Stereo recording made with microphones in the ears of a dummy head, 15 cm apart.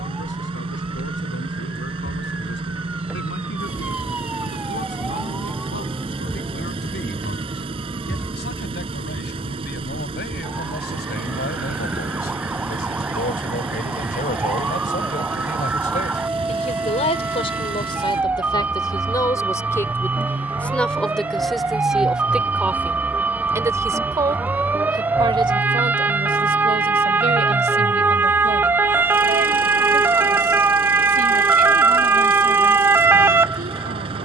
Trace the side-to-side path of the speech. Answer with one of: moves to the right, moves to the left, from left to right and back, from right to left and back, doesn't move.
moves to the right.